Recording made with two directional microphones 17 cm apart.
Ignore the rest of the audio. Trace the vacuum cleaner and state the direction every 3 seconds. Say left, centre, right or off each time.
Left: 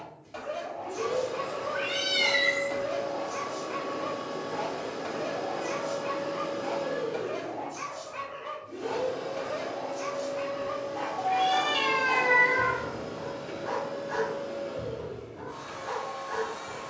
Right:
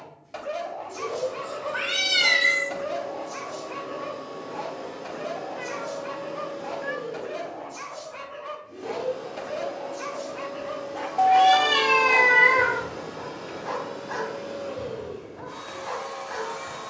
left, left, left, centre, right, right.